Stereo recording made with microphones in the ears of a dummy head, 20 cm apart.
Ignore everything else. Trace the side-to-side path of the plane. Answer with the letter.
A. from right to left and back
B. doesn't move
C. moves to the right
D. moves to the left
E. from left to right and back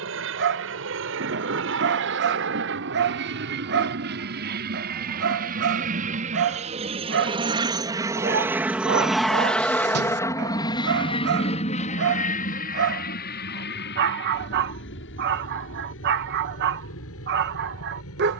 D.